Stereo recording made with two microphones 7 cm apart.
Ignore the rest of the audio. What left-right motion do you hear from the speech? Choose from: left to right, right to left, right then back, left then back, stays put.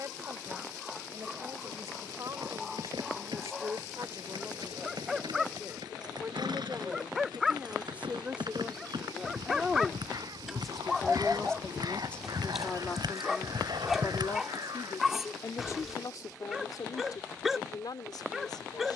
right to left.